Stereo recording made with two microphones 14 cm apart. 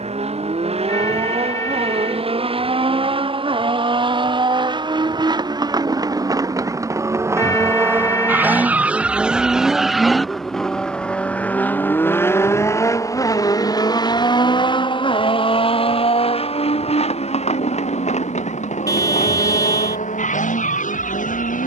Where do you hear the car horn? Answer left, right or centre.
left.